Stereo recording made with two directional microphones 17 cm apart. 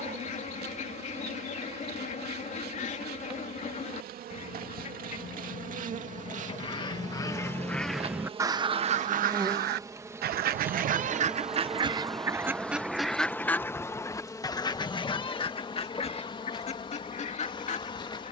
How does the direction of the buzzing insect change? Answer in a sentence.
In this clip you hear the buzzing insect travel towards the left.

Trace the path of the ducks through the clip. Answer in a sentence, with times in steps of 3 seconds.
In this clip you hear the ducks on the left from 0 s, in the centre from 6 s, on the right from 9 s, in the centre from 12 s and on the left from 15 s.